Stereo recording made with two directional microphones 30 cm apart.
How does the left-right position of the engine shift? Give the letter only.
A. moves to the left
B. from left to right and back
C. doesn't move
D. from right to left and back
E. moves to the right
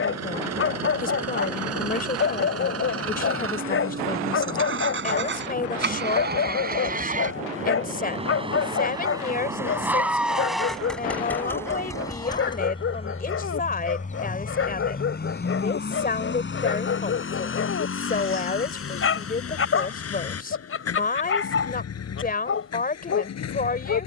A.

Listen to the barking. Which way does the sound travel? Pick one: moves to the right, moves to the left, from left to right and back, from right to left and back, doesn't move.
doesn't move.